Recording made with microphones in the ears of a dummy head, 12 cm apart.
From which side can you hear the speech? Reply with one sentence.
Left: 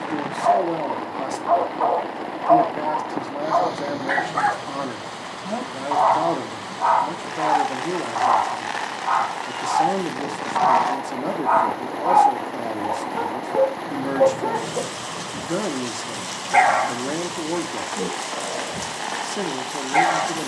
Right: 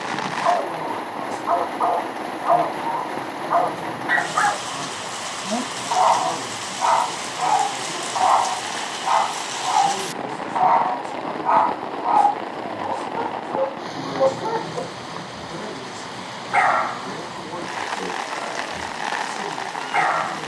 In this clip you hear the speech on the left.